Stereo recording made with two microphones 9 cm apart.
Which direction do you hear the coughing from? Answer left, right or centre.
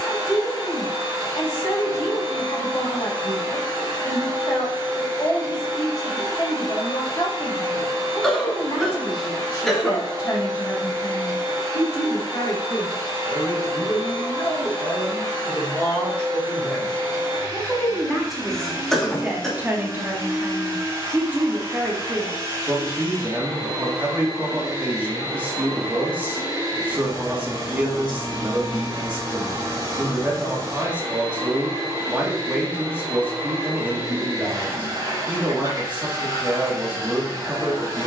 centre.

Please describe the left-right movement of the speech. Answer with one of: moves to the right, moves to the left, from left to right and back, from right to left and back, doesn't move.
moves to the right.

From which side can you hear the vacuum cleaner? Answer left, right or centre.
right.